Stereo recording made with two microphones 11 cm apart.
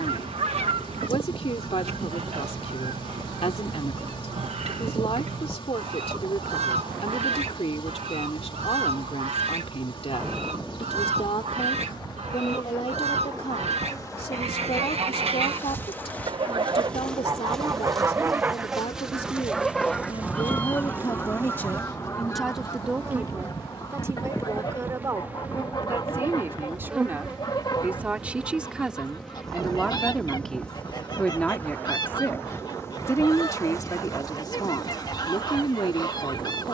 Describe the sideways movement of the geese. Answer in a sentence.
In this clip you hear the geese travel towards the left.